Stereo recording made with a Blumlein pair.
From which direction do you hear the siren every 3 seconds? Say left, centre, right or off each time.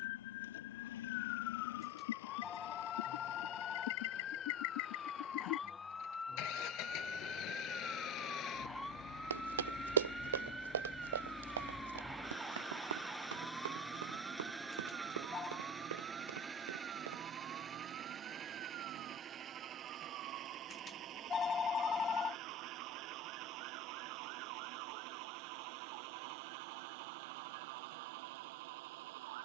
left, left, centre, centre, right, right, right, right, right, right.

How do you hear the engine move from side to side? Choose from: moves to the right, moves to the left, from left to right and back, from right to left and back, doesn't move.
moves to the right.